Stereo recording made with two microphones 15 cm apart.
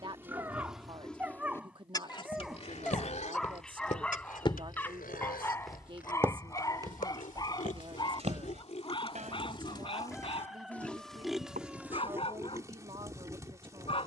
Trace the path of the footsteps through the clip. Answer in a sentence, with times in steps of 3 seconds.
You can hear the footsteps on the left from 0 s, on the right from 6 s and not at all from 12 s.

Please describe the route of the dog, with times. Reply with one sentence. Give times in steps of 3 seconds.
You can hear the dog in the centre from 0 s and on the left from 6 s.